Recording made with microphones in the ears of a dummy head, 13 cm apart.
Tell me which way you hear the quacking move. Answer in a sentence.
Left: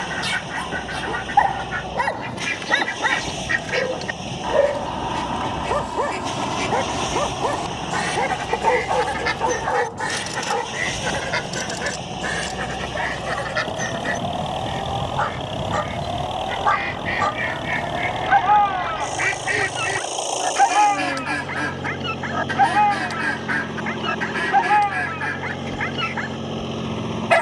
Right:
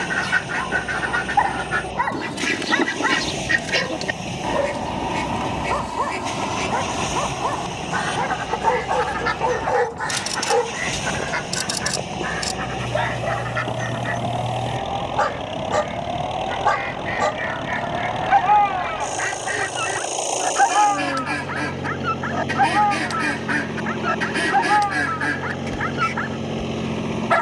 You can hear the quacking move from right to left and back again.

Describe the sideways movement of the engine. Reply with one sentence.
You can hear the engine stay in one place.